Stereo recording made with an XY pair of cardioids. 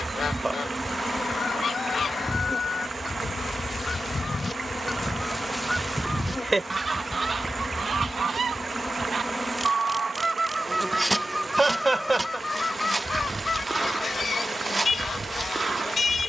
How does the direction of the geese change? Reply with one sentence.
You can hear the geese go right and come back.